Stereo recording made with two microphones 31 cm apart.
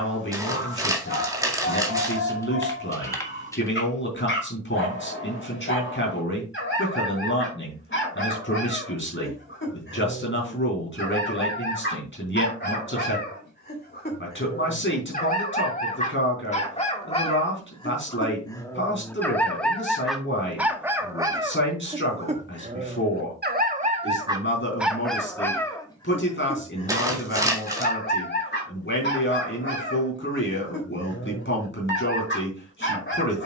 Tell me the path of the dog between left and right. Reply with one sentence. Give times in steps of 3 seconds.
In this clip you hear the dog on the left from 0 s, in the centre from 18 s, on the right from 21 s, in the centre from 24 s and on the left from 27 s.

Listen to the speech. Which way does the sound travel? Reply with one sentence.
You can hear the speech stay put.